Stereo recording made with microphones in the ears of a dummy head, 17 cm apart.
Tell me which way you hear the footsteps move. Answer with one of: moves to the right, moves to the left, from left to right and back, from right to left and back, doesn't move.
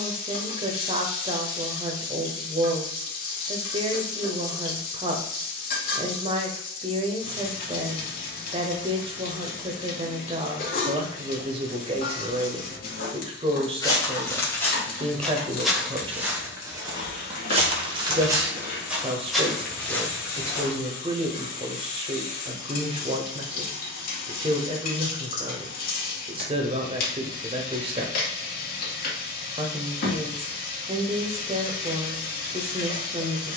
from left to right and back.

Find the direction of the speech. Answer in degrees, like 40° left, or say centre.
30° right.